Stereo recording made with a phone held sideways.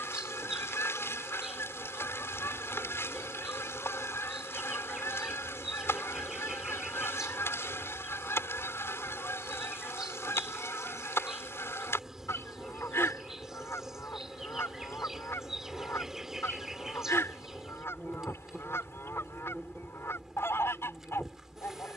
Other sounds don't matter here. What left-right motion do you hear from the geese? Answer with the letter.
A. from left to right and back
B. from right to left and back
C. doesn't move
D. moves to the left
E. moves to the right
C.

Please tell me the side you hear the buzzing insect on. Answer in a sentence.
You can hear the buzzing insect in the centre.